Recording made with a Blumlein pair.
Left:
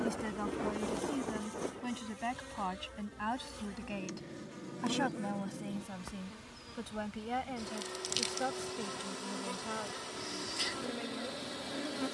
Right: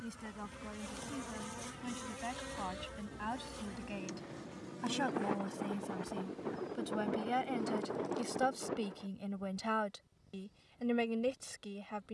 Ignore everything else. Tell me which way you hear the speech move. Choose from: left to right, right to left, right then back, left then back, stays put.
left to right.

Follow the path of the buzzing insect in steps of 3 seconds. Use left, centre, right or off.
centre, centre, left, left.